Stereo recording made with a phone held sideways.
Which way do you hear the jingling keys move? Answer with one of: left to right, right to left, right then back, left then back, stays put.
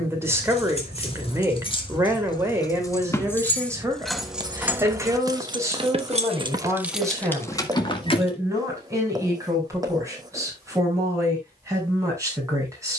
right then back.